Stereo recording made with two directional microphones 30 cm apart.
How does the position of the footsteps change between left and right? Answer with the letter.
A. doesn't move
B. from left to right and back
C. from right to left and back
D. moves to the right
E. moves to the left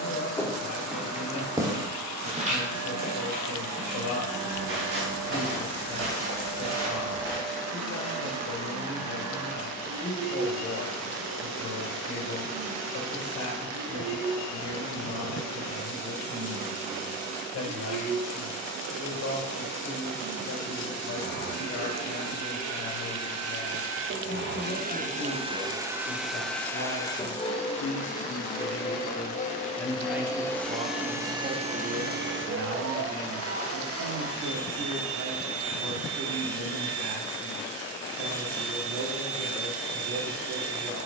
D.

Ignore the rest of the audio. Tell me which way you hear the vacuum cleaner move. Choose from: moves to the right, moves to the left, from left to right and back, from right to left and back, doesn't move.
from right to left and back.